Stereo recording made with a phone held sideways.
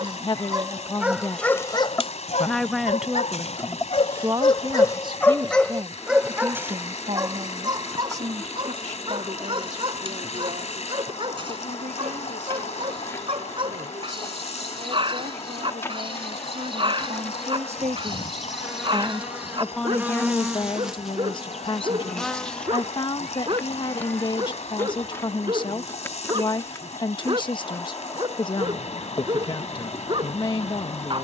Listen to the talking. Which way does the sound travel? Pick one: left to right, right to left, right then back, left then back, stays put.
right then back.